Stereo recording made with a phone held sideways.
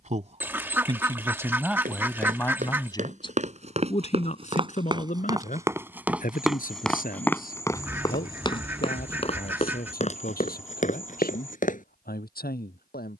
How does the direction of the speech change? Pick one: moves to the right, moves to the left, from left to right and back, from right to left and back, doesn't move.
moves to the left.